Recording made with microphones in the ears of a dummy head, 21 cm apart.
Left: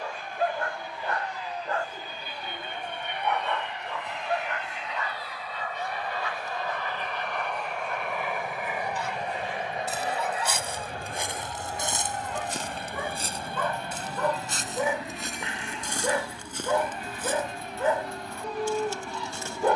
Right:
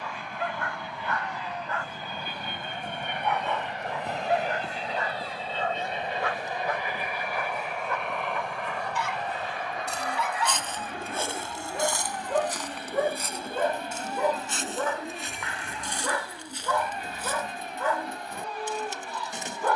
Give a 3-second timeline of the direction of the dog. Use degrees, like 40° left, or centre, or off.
30° left, 20° right, 50° right, 60° right, 20° right, 20° left, 20° left.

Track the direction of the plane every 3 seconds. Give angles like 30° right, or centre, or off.
50° right, 30° right, centre, 30° left, 50° left, 60° left, 60° left.